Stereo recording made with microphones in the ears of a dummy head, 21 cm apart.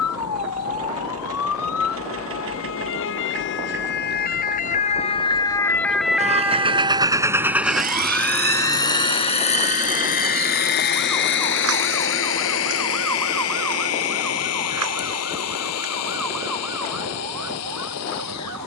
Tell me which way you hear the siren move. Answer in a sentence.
In this clip you hear the siren move from left to right.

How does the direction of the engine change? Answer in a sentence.
You can hear the engine go from the right side to the left.